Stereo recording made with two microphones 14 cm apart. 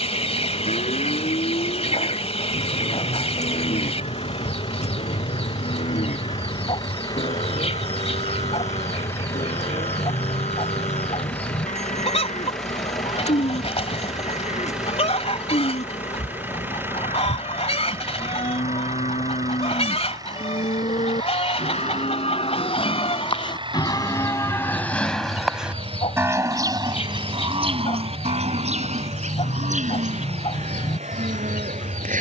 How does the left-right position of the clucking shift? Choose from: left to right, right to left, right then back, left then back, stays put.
stays put.